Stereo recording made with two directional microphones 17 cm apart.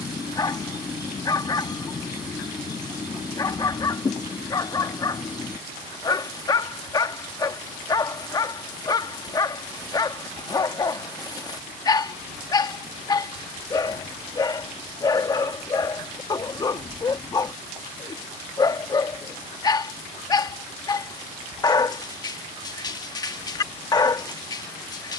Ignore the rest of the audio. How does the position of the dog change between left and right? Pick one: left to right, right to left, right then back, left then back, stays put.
stays put.